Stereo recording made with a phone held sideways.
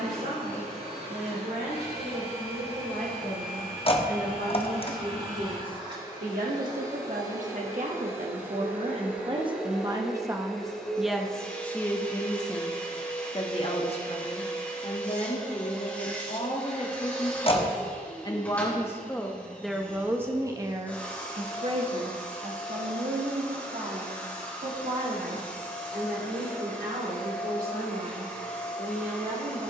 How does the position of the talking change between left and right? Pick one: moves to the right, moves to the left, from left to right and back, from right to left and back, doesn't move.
from right to left and back.